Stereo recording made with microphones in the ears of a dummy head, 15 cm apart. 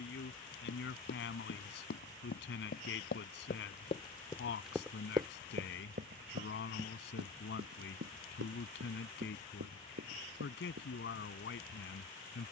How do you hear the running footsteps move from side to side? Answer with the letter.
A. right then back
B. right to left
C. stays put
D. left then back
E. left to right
E.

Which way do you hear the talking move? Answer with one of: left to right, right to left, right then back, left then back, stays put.
stays put.